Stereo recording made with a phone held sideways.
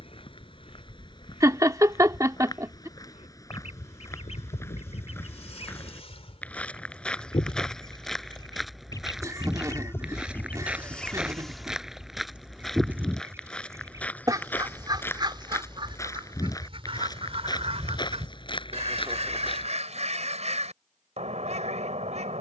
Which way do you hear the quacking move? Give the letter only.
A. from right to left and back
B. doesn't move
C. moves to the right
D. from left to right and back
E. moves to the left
C.